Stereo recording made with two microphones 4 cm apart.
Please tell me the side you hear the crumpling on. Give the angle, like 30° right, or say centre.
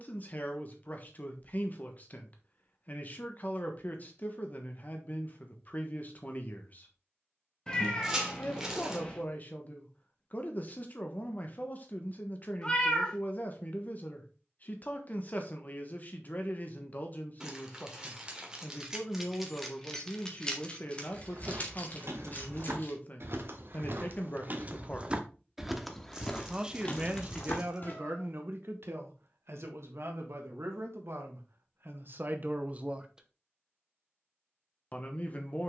20° right.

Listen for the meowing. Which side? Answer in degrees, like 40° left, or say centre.
20° left.